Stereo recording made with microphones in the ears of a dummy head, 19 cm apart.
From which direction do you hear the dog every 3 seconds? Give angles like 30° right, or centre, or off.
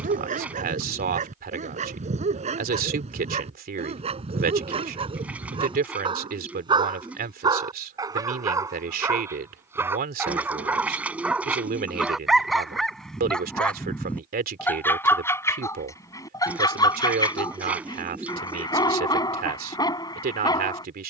40° right, 30° right, 20° right, 10° right, centre, 20° left, 20° left.